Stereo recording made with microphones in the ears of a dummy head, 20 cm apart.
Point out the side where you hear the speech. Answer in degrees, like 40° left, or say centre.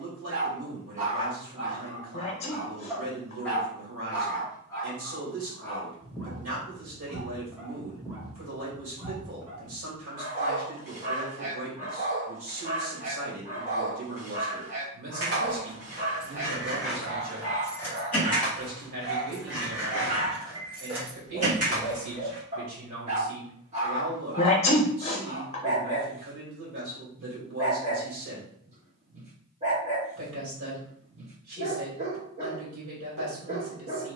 60° right.